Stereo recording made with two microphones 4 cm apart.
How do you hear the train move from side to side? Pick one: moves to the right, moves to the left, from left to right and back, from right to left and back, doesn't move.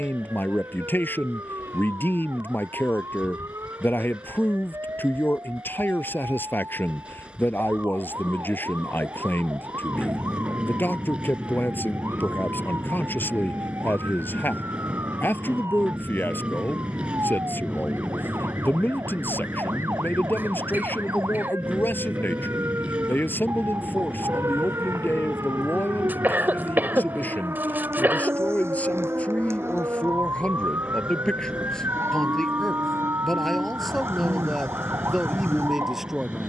doesn't move.